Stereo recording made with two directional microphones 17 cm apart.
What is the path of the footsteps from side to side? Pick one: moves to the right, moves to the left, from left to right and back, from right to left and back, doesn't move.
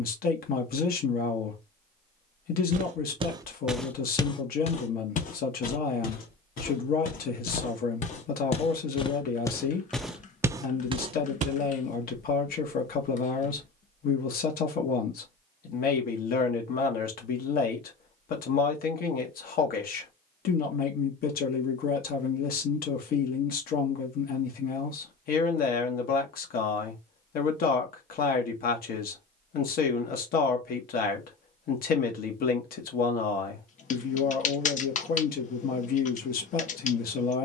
from right to left and back.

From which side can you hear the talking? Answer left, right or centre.
left.